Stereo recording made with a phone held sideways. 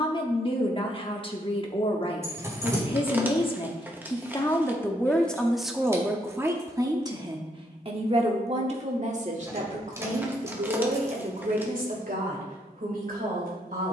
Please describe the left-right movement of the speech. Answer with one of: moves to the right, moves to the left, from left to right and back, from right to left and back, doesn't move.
moves to the right.